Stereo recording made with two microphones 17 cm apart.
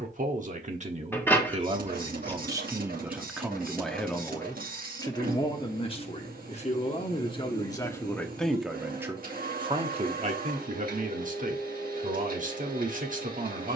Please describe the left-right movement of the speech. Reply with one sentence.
You can hear the speech move from right to left and back again.